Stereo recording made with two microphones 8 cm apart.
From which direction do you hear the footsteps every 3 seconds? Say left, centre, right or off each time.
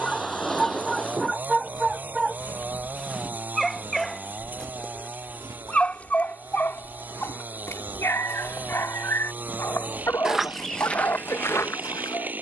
left, right, right, centre.